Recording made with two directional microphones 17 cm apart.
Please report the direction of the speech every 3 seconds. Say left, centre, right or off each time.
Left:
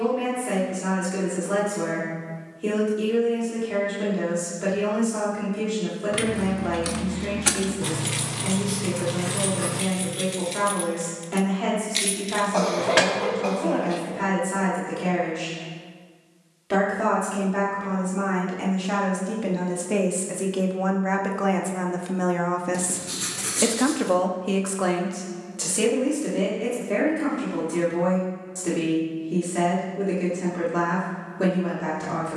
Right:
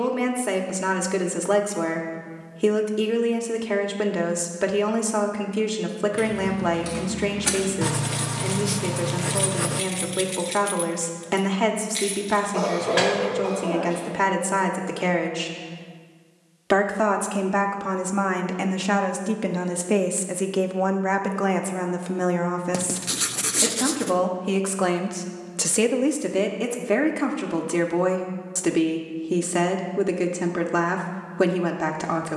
right, right, right, right, right, right, right, centre, right, right, right.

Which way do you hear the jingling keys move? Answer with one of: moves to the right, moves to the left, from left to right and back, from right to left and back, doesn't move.
from left to right and back.